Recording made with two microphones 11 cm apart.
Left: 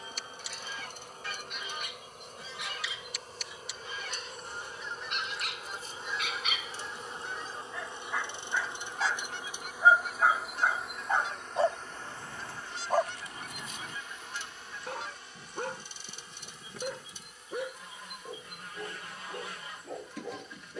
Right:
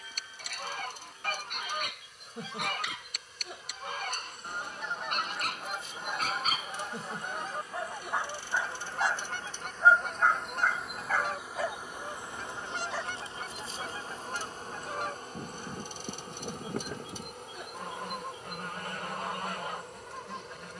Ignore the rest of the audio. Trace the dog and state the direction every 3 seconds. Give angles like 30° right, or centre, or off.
60° right, 50° right, 30° right, 10° left, 50° left, 70° left, 80° left.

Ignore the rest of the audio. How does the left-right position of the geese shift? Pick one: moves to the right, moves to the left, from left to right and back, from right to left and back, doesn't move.
doesn't move.